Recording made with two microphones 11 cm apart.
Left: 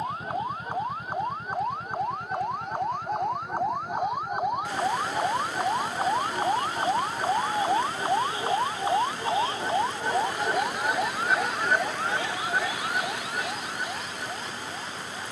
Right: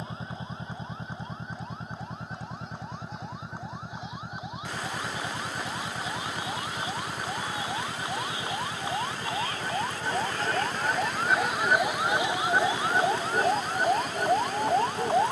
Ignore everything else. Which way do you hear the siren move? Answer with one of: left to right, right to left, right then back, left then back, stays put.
left to right.